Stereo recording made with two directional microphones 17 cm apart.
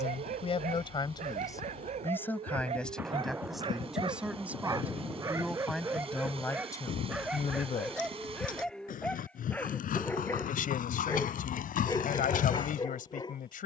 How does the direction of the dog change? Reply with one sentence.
You can hear the dog move to the left.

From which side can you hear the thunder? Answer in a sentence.
In this clip you hear the thunder in the centre.